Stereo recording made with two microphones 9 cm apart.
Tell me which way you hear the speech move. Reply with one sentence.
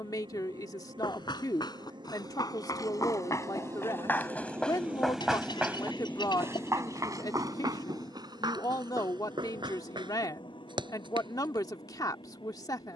In this clip you hear the speech stay in one place.